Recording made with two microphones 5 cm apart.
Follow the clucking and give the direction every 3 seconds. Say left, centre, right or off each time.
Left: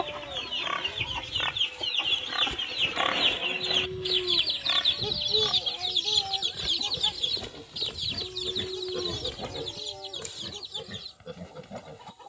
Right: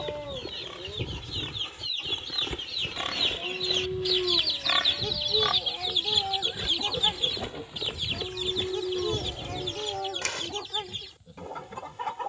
left, centre, right, right.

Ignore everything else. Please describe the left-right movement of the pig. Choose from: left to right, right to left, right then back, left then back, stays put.
right then back.